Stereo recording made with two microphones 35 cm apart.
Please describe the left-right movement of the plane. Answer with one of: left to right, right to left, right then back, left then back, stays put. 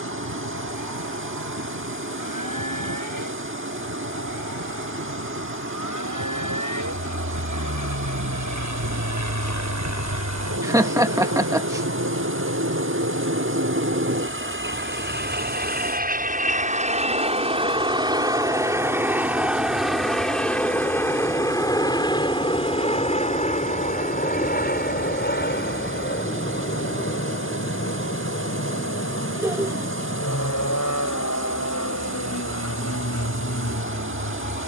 right to left.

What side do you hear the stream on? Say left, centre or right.
right.